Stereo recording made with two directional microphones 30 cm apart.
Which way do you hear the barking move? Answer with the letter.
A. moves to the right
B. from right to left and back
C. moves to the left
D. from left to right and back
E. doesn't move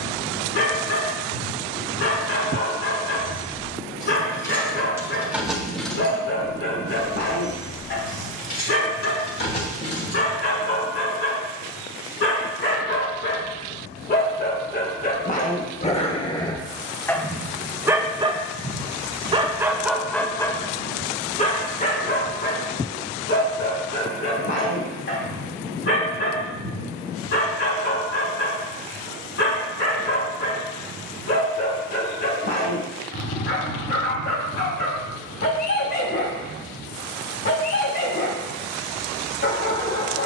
D.